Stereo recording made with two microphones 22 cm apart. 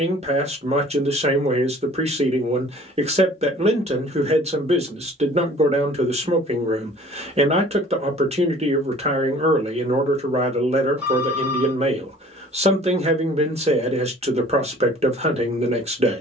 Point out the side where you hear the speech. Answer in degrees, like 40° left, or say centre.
30° right.